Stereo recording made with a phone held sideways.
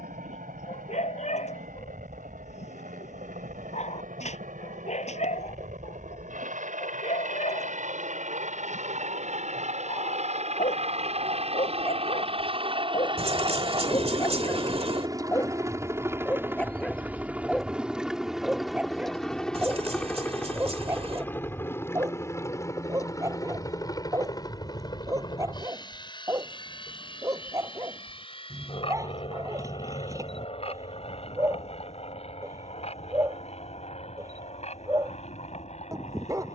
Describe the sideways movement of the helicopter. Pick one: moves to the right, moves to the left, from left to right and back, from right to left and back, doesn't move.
moves to the left.